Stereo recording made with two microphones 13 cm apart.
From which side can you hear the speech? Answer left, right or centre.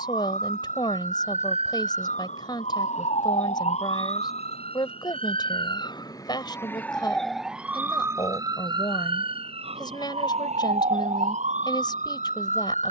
left.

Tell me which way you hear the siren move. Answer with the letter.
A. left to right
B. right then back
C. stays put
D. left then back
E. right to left
A.